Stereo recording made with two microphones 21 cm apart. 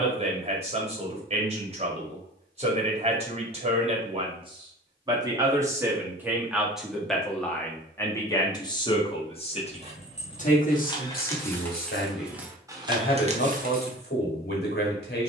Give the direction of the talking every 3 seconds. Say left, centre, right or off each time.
right, right, centre, left, left.